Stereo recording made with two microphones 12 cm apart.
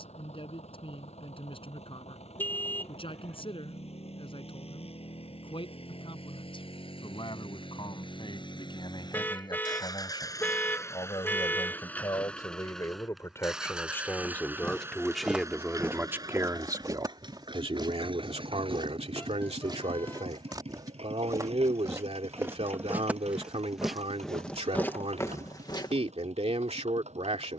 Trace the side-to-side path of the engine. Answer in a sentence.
In this clip you hear the engine move from left to right.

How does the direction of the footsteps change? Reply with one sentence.
In this clip you hear the footsteps go right and come back.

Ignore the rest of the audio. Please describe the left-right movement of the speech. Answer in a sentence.
You can hear the speech move to the right.